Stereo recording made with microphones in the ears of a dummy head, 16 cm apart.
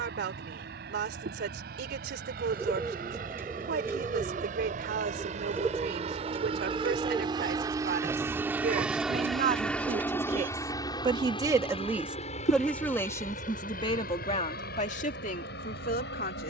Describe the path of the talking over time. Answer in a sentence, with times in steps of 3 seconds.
In this clip you hear the talking on the right from 0 s and on the left from 12 s.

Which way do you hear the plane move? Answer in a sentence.
In this clip you hear the plane move from right to left.